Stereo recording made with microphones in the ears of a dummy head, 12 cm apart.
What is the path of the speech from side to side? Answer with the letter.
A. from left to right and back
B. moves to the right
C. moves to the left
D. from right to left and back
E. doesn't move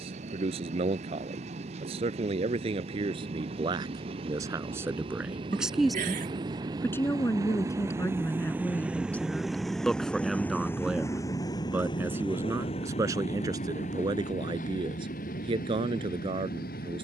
D.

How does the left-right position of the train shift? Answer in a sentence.
You can hear the train move to the left.